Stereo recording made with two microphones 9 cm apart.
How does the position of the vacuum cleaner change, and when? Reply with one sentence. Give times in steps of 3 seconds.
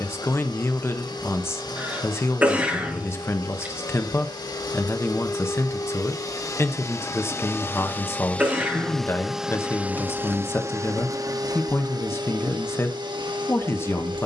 You can hear the vacuum cleaner on the left from 0 s and on the right from 9 s.